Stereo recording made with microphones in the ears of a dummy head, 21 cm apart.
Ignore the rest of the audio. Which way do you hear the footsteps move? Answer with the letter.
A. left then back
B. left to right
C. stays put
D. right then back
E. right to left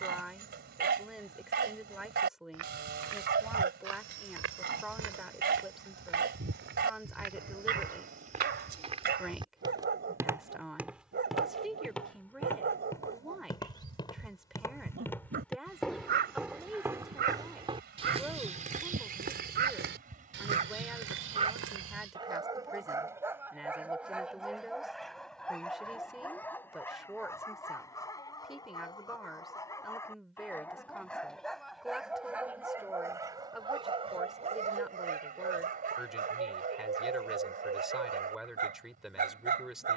A.